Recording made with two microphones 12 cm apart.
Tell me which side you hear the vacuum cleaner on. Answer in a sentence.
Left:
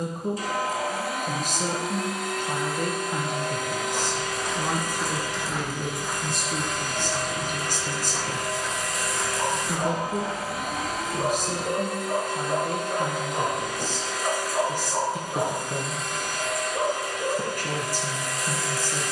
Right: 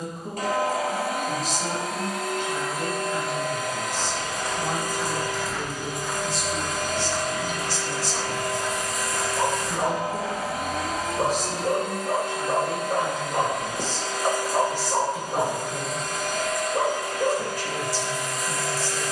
In this clip you hear the vacuum cleaner on the right.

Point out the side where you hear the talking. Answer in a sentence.
You can hear the talking on the left.